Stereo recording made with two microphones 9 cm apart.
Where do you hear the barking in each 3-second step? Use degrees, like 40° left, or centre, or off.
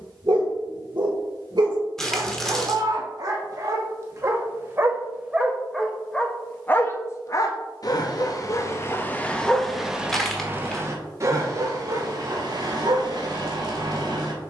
50° right, 30° right, 30° left, 20° right, 50° right.